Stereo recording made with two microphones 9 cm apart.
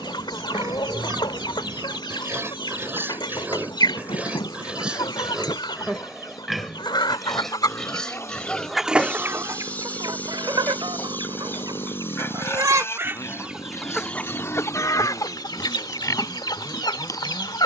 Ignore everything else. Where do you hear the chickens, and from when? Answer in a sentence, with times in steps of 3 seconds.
In this clip you hear the chickens on the left from 0 s, on the right from 9 s, in the centre from 12 s and on the left from 15 s.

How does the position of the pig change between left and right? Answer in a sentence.
You can hear the pig go from the right side to the left.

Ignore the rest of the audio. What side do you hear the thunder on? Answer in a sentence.
You can hear the thunder on the left.